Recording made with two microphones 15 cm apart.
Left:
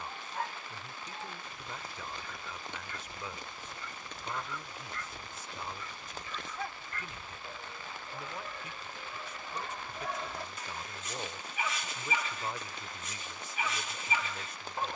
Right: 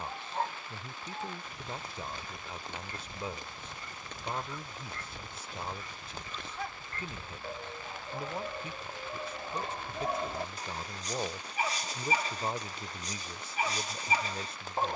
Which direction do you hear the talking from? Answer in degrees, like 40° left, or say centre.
30° right.